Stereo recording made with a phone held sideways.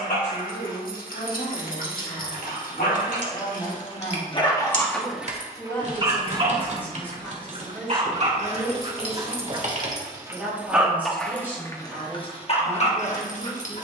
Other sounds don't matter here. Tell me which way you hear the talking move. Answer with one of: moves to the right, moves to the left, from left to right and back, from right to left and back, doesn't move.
moves to the right.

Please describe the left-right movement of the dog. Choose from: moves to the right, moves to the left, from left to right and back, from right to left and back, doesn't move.
from left to right and back.